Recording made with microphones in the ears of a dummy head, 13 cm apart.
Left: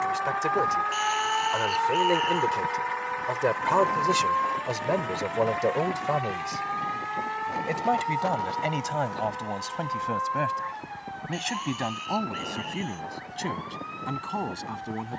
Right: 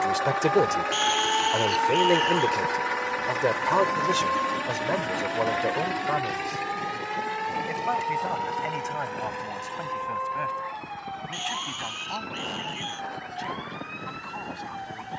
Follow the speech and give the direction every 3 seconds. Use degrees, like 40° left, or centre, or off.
20° right, 10° left, 30° left, 40° left, 50° left.